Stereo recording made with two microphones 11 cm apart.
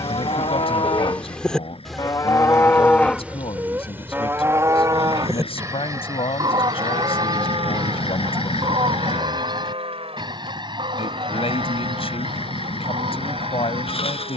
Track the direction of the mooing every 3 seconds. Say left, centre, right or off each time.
left, right, right, right, right.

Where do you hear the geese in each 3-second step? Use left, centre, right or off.
centre, right, right, right, right.